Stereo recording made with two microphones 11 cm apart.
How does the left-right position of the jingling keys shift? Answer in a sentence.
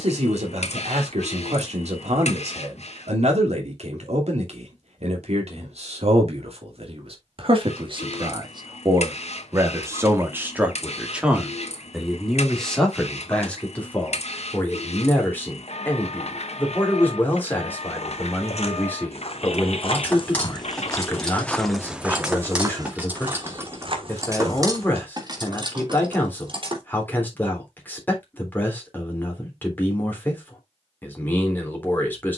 You can hear the jingling keys travel towards the right.